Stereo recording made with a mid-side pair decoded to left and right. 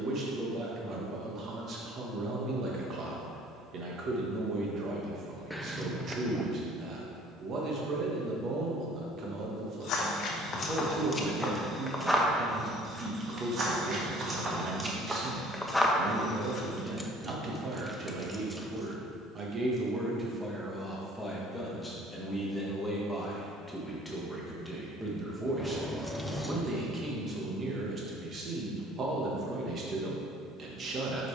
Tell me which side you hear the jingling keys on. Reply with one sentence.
In this clip you hear the jingling keys in the centre.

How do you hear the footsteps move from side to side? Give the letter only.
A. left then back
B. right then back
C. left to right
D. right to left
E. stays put
B.